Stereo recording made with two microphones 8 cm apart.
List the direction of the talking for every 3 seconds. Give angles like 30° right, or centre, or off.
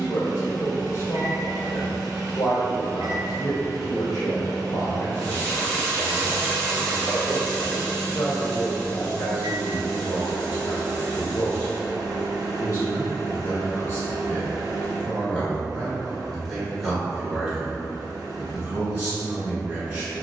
50° left, 50° left, 50° left, 50° left, 30° left, centre, 20° right.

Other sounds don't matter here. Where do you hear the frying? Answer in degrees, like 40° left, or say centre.
20° left.